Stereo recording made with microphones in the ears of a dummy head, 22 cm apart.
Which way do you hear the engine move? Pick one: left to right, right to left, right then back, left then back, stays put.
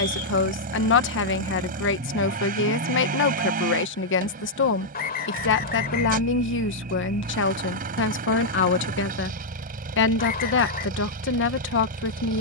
stays put.